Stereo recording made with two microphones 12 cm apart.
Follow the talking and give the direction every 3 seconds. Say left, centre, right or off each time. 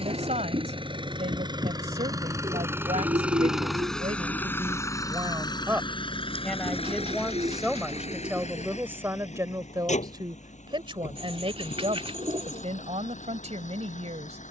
right, right, centre, right, right.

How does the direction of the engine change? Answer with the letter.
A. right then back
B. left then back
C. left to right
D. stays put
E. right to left
E.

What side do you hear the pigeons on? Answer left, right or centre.
right.